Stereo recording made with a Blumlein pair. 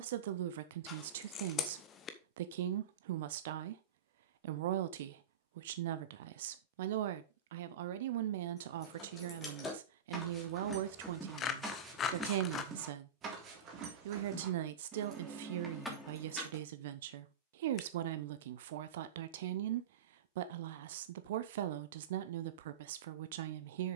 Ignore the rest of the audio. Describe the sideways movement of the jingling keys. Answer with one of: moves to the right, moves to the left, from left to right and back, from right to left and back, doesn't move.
from left to right and back.